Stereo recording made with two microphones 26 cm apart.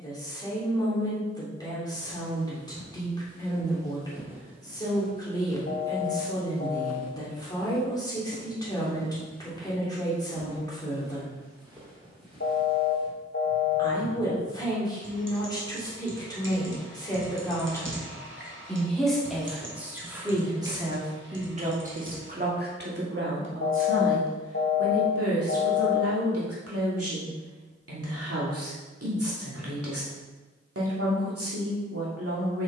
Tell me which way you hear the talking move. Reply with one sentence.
In this clip you hear the talking travel towards the right.